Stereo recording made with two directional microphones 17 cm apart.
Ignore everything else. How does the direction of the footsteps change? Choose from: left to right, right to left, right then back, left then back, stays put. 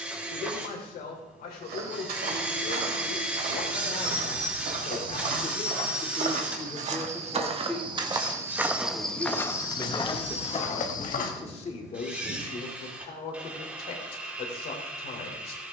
right to left.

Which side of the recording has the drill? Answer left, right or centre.
centre.